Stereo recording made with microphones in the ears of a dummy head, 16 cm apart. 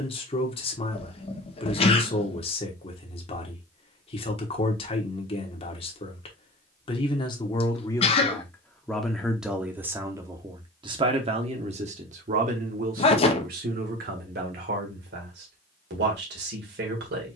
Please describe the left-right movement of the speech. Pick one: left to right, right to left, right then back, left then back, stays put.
left to right.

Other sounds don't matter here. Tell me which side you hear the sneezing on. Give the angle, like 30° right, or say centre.
40° left.